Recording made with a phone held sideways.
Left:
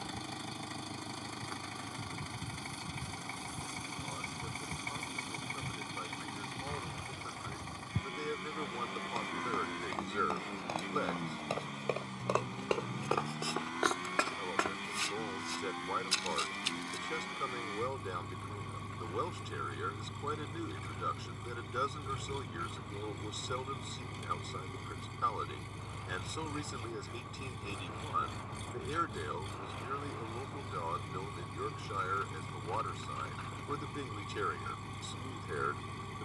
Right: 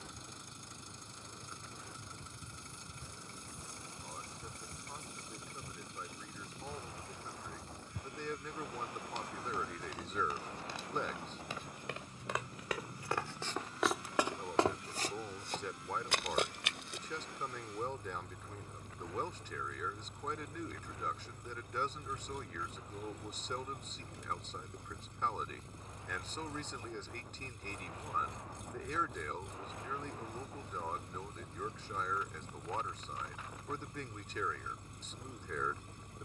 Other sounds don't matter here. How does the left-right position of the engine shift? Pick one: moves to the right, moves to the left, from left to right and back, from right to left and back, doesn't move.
doesn't move.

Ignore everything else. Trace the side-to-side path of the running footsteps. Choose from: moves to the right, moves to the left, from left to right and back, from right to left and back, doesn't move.
moves to the right.